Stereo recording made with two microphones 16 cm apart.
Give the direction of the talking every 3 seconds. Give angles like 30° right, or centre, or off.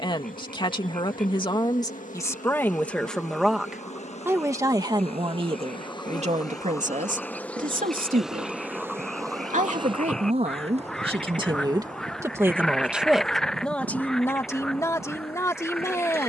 20° left, 20° right, 50° right, 40° right, centre, 20° left.